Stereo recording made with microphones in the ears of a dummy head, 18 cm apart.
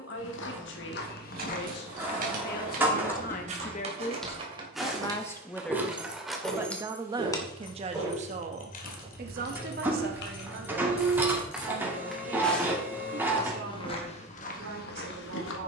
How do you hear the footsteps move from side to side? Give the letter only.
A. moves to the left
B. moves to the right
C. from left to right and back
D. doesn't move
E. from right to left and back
C.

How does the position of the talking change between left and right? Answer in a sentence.
In this clip you hear the talking travel towards the right.